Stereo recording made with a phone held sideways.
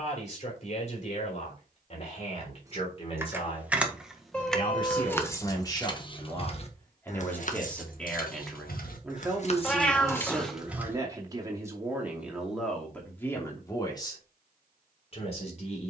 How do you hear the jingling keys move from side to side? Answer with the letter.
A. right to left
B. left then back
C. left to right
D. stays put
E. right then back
B.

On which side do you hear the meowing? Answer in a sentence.
You can hear the meowing in the centre.